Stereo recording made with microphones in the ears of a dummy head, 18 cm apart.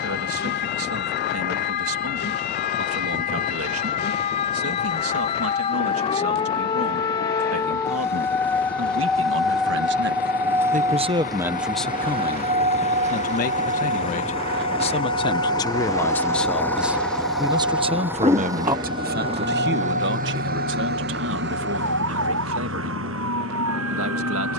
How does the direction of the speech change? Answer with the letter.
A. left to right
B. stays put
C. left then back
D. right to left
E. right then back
C.